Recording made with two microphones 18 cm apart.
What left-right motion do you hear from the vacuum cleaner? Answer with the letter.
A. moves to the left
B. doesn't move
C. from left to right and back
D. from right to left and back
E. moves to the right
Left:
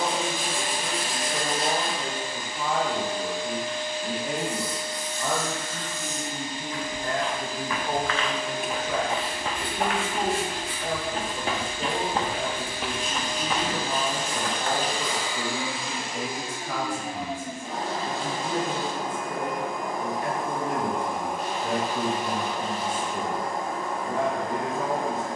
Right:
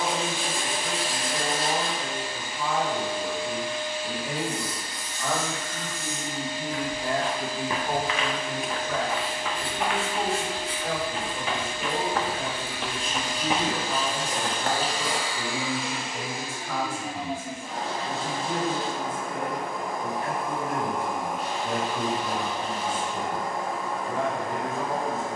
B.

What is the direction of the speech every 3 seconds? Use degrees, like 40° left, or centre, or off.
40° left, 20° left, centre, 30° left, 40° left, 40° left, 40° left, 40° left, 40° left.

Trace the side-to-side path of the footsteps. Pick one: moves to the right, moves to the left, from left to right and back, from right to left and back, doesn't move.
from right to left and back.